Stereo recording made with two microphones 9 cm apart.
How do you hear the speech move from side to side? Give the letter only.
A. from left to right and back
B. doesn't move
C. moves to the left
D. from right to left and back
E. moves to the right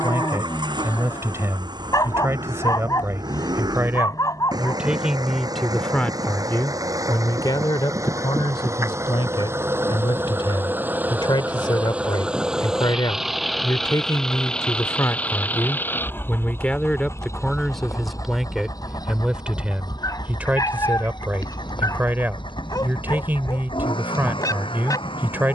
D.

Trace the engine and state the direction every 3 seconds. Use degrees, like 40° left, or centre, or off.
50° right, 50° right, 40° right, 20° right, centre, 30° left, 50° left, 60° left, 70° left.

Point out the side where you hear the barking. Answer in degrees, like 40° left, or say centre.
40° left.